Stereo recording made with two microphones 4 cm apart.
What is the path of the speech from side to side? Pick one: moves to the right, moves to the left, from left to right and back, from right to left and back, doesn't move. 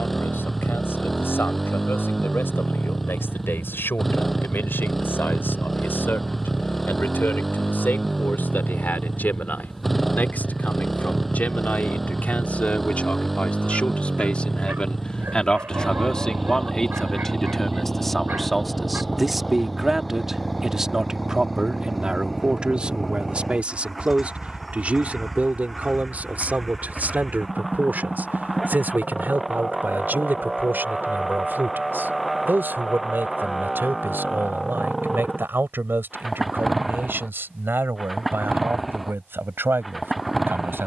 moves to the right.